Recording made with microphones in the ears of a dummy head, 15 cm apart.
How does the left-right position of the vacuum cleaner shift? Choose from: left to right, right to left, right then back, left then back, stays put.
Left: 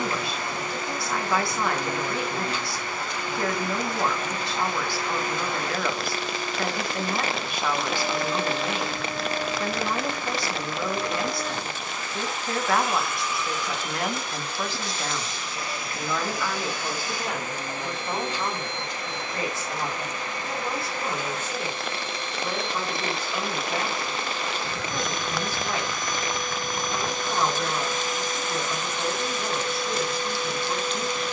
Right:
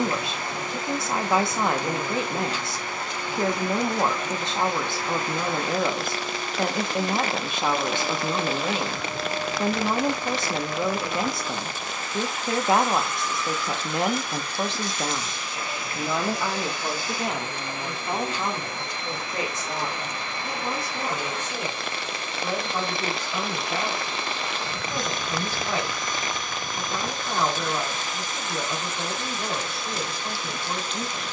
right to left.